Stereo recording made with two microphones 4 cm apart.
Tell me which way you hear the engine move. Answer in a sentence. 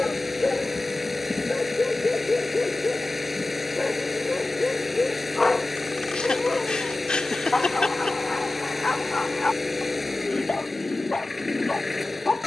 You can hear the engine stay in one place.